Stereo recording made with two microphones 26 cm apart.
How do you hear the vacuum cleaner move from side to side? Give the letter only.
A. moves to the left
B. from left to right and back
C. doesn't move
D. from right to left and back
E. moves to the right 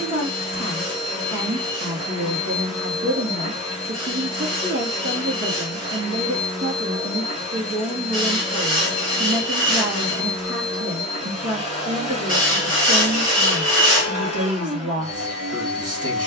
C.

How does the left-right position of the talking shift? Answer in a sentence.
In this clip you hear the talking stay in one place.